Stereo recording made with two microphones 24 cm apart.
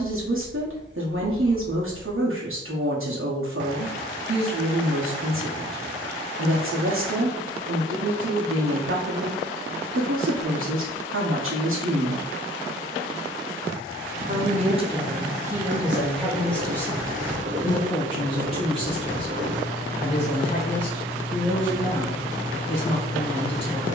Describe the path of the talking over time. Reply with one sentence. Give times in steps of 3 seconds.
You can hear the talking on the right from 0 s, in the centre from 15 s and on the left from 18 s.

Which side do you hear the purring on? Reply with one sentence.
You can hear the purring on the right.